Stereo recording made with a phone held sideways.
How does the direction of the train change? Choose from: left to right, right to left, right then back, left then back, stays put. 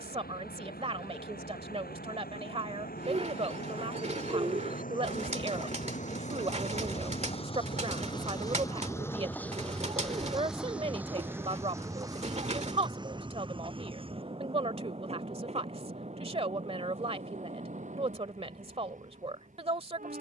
left to right.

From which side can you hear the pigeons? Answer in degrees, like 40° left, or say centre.
40° right.